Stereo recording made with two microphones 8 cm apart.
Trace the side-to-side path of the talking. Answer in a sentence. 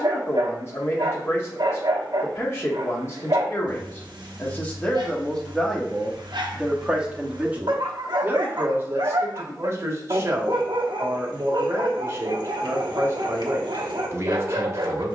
In this clip you hear the talking go from the left side to the right.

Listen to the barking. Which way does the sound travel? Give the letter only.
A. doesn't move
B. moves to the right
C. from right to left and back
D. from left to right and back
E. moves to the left
A.